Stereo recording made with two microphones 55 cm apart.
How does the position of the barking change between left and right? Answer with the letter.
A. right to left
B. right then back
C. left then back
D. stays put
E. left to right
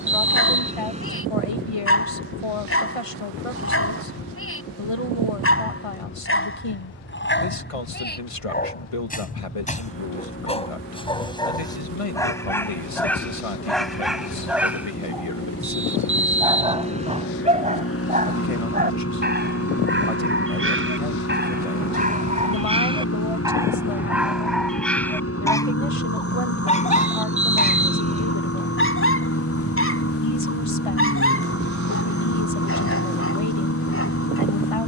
B.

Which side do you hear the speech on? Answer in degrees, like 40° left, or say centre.
70° left.